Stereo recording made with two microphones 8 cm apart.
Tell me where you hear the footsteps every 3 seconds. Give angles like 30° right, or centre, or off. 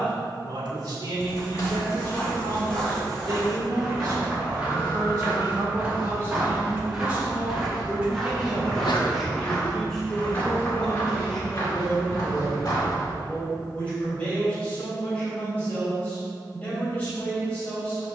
30° left, 10° right, centre, 30° left, 50° left, off.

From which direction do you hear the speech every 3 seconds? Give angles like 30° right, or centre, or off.
60° right, 50° right, 20° right, centre, 20° left, 20° left.